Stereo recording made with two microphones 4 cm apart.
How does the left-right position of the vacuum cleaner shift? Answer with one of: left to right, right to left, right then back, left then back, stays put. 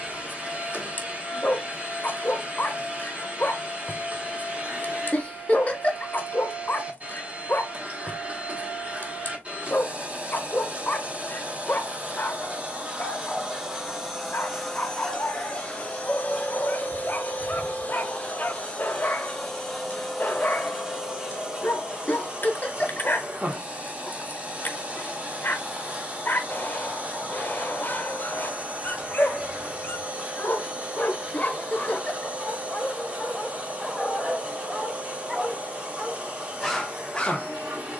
left then back.